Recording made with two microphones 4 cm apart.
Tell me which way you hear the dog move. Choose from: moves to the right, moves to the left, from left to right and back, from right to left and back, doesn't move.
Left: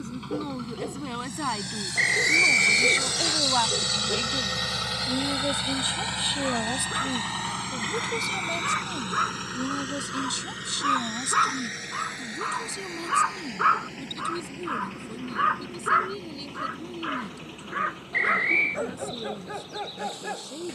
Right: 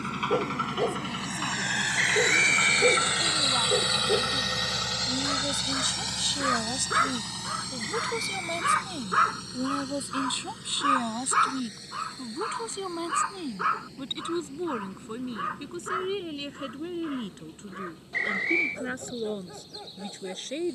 moves to the left.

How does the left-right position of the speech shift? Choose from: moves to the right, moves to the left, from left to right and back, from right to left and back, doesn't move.
moves to the right.